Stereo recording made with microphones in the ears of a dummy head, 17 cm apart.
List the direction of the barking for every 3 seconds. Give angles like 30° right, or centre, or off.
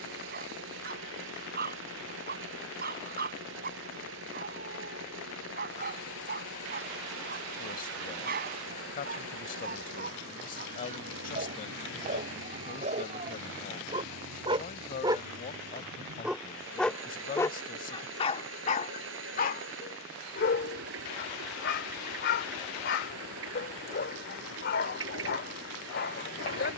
60° right, 60° right, 60° right, 50° right, 40° right, centre, 50° left, 60° left, 60° left.